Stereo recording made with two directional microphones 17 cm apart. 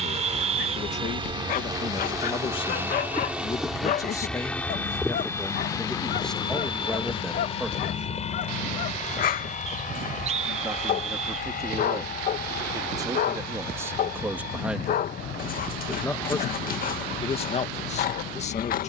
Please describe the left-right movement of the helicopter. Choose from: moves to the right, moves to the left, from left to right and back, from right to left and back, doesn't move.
moves to the left.